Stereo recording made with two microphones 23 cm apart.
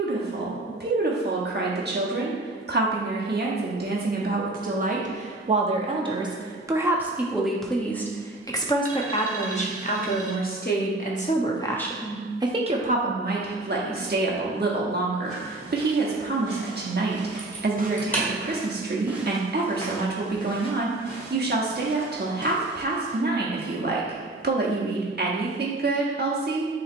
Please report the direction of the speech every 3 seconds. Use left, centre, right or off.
right, right, centre, left, right, right, right, right, right.